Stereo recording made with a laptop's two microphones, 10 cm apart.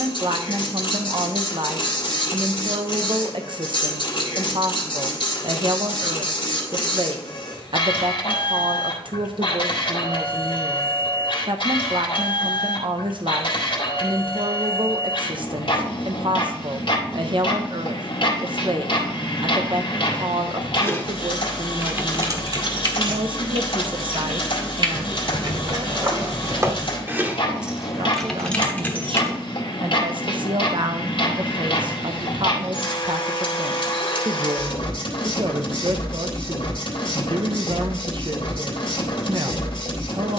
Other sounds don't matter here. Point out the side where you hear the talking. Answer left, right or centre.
right.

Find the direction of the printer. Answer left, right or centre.
left.